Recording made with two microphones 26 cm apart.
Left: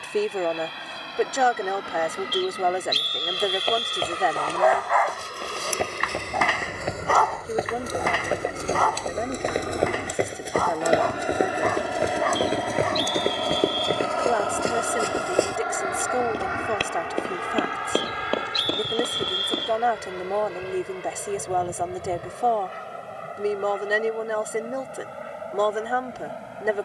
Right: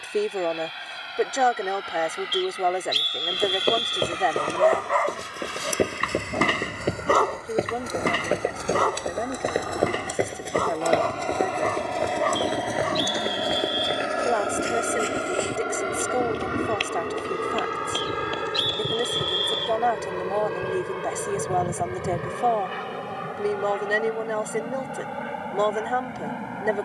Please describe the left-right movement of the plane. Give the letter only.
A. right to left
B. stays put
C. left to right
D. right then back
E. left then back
C.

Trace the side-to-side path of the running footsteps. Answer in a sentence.
In this clip you hear the running footsteps travel towards the left.